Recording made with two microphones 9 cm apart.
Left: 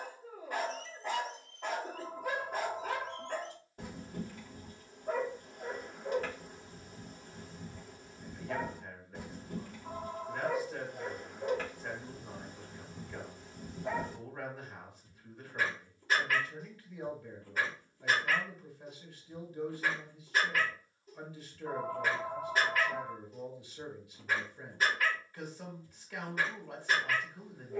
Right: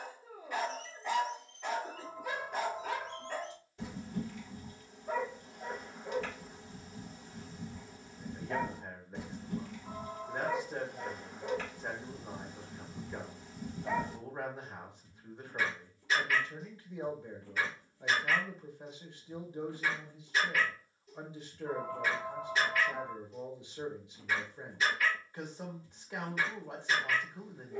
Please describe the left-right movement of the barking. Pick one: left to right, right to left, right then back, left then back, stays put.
stays put.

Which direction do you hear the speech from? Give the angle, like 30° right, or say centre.
20° right.